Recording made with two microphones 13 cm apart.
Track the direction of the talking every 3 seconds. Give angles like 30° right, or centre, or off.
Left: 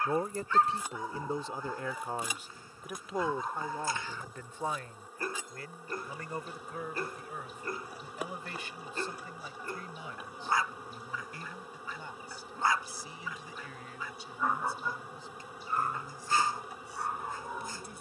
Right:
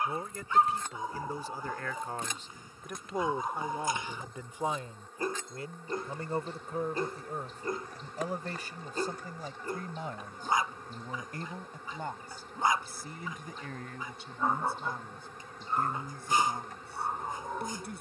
20° left, 10° right, 40° right, 50° right, 50° right, 60° right.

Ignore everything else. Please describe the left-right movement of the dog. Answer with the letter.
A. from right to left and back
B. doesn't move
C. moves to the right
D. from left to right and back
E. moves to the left
B.